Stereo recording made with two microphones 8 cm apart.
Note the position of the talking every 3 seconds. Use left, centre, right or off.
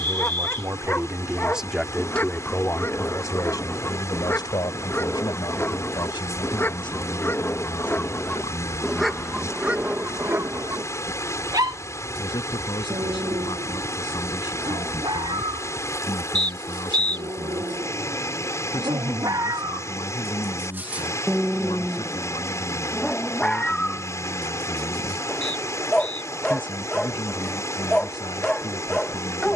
centre, left, left, left, left, left, left, left, left, left.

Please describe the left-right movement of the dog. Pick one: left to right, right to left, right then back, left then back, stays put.
right then back.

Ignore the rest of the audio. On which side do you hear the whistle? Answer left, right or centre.
right.